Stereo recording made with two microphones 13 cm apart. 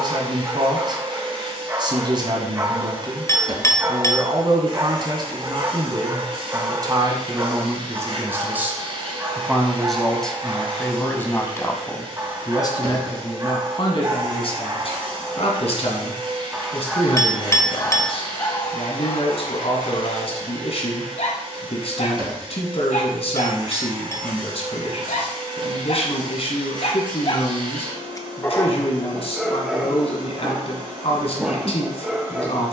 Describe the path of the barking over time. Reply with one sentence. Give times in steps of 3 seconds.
In this clip you hear the barking on the right from 0 s, in the centre from 15 s, on the left from 18 s and in the centre from 27 s.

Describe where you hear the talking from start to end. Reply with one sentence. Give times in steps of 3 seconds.
In this clip you hear the talking on the right from 0 s, in the centre from 9 s and on the left from 12 s.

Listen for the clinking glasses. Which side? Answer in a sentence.
In this clip you hear the clinking glasses on the left.